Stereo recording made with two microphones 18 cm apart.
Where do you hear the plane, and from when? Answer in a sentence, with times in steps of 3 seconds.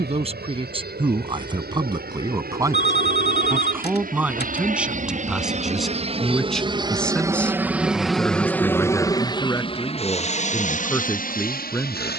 In this clip you hear the plane on the right from 0 s, in the centre from 6 s and on the left from 9 s.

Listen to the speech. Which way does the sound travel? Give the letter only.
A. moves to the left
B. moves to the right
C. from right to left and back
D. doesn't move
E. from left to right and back
A.